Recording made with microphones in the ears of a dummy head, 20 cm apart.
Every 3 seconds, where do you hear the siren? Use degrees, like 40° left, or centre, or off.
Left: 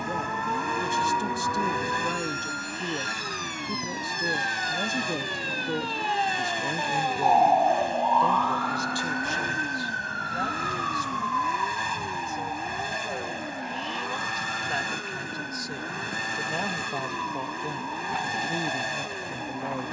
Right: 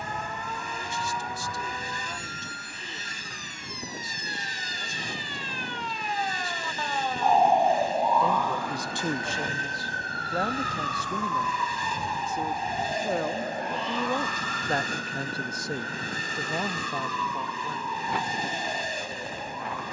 70° left, 50° left, centre, 30° right, 50° right, 60° right, 60° right.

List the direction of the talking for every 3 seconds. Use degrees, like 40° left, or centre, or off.
40° left, 40° left, 20° left, 40° right, 50° right, 10° right, 30° left.